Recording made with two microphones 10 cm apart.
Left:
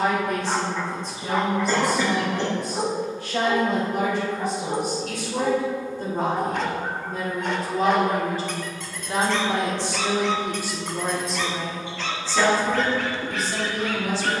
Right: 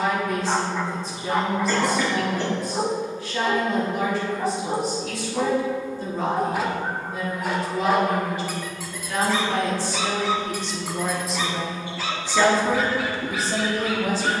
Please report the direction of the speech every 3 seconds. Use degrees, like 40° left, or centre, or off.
60° left, 60° left, 40° left, 10° left, 30° right.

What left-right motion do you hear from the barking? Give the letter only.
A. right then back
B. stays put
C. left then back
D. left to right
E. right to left
B.